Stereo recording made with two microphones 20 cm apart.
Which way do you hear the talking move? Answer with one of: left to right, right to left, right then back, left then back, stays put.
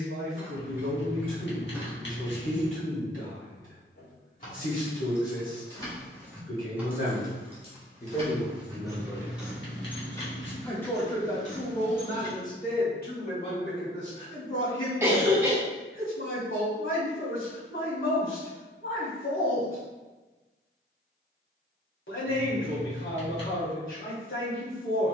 right then back.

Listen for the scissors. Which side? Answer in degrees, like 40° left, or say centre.
50° left.